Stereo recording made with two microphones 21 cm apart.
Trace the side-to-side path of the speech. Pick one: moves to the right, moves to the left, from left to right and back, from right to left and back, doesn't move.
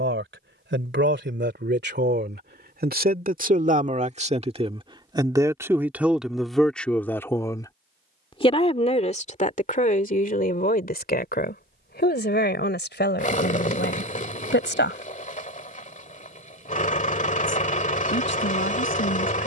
moves to the left.